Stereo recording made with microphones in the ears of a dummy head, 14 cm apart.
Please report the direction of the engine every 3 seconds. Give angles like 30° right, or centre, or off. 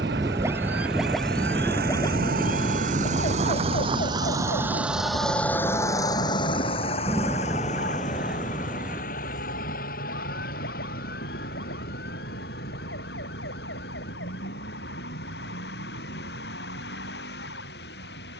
70° right, 20° right, 40° left, 60° left, 70° left, 70° left.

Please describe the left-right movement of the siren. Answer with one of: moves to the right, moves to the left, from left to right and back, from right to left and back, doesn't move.
moves to the left.